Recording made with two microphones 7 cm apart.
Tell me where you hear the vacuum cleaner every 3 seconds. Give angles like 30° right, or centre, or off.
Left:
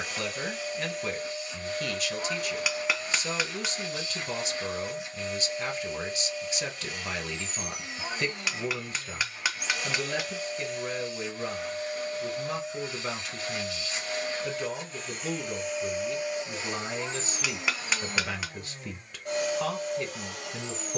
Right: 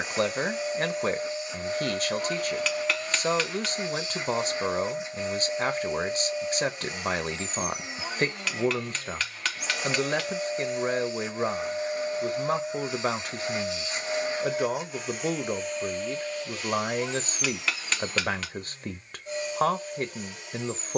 20° right, 20° right, 20° right, 20° right, 20° right, 20° left, 60° left.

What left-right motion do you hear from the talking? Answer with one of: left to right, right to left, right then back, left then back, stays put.
stays put.